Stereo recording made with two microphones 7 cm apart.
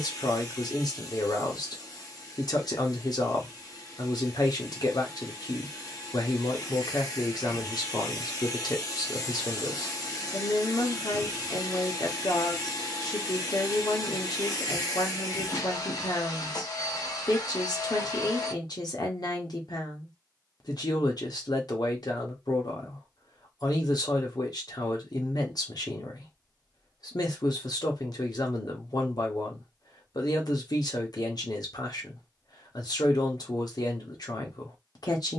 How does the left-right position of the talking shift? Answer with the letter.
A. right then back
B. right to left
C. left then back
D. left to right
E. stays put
E.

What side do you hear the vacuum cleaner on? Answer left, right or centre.
left.